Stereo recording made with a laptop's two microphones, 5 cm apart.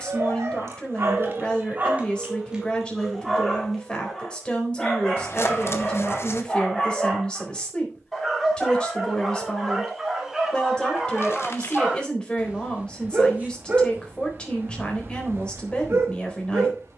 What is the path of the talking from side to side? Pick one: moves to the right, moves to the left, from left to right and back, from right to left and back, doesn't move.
doesn't move.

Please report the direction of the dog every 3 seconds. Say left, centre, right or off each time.
right, centre, centre, centre, right, right.